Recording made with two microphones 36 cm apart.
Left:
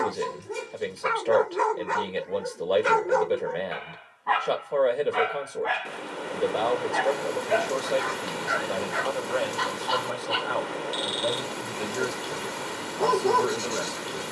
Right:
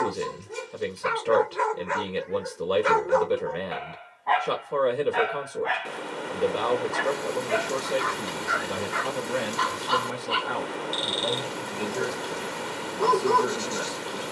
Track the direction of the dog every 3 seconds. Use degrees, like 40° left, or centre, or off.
60° left, 20° left, 10° right, 10° right, 10° right.